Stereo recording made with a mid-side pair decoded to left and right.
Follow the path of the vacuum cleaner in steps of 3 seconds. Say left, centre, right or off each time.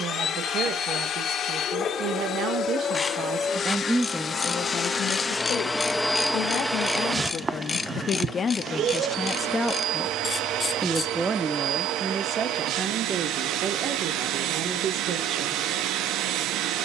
left, left, right, right, right, right.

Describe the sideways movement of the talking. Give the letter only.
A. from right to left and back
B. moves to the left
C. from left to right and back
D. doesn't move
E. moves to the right
A.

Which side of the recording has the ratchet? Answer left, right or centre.
left.